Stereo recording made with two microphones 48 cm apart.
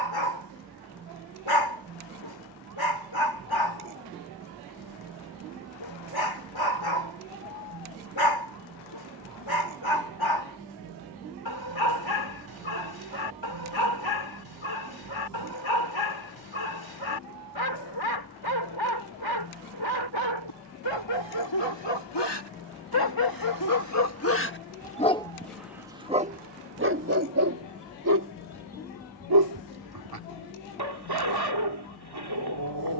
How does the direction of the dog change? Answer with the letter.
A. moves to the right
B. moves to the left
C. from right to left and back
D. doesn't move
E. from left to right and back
A.